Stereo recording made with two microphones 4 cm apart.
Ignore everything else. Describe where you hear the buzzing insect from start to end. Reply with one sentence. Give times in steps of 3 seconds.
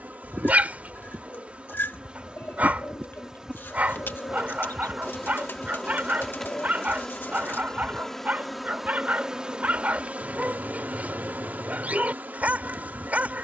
In this clip you hear the buzzing insect on the right from 0 s, in the centre from 3 s and on the right from 9 s.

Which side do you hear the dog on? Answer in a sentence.
You can hear the dog on the right.